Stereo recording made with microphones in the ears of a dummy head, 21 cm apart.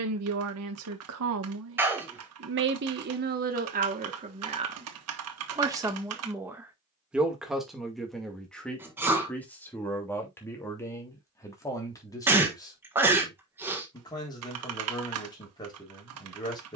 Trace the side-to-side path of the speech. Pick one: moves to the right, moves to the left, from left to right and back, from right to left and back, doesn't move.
moves to the left.